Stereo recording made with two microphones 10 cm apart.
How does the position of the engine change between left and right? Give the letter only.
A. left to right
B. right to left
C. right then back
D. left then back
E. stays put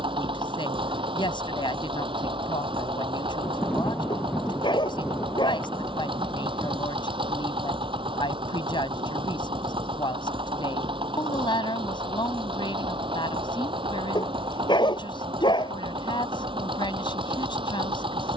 E.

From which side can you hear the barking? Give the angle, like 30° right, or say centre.
50° left.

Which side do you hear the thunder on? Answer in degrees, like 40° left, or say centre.
10° left.